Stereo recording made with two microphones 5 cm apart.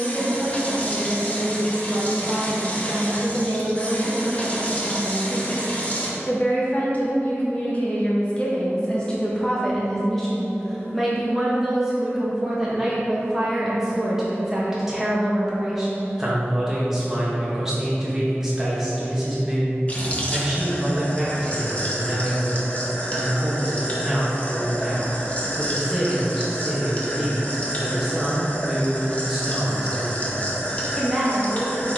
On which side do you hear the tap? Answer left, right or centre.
left.